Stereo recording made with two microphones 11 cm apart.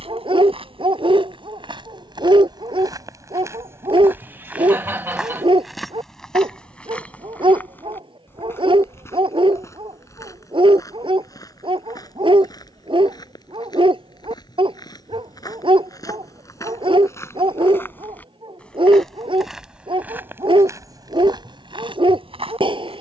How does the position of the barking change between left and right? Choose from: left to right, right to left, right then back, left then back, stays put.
stays put.